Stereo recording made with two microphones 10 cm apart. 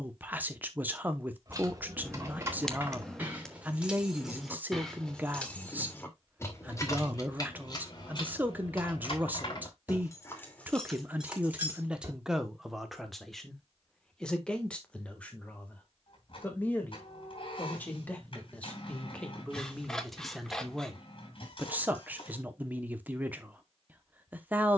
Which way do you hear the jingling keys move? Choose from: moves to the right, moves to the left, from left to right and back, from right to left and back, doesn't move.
from right to left and back.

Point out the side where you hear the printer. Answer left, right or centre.
left.